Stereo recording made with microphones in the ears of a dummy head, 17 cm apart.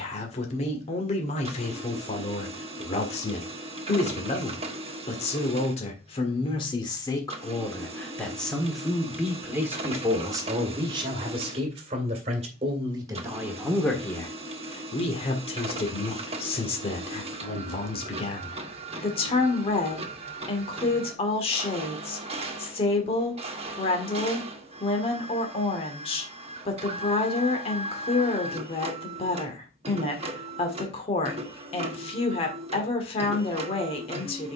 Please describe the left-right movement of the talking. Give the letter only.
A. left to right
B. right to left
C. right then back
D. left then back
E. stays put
C.